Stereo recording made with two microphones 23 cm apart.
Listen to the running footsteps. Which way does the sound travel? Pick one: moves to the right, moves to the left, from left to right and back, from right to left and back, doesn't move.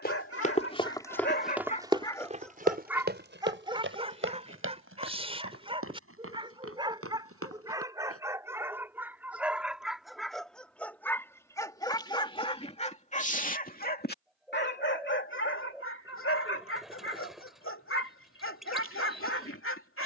moves to the right.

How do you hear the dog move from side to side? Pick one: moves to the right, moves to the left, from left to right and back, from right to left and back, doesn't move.
from left to right and back.